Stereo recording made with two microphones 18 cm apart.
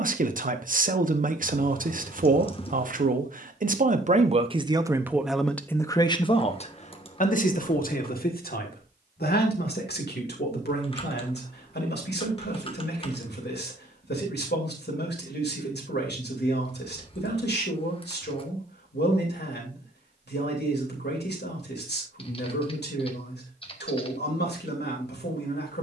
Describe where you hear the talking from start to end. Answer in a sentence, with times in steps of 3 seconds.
In this clip you hear the talking on the right from 0 s and on the left from 6 s.